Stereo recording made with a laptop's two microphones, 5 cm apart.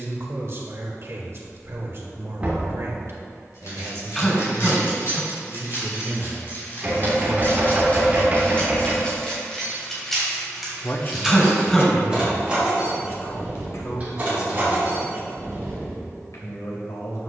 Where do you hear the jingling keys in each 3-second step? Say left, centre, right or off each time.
off, left, left, centre, right, right.